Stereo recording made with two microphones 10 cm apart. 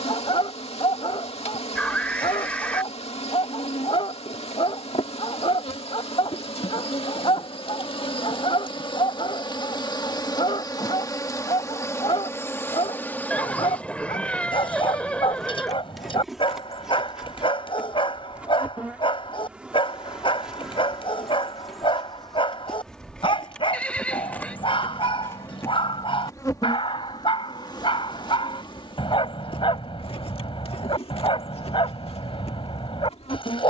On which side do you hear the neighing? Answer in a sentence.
In this clip you hear the neighing in the centre.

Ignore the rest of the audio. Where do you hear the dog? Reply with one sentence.
You can hear the dog on the left.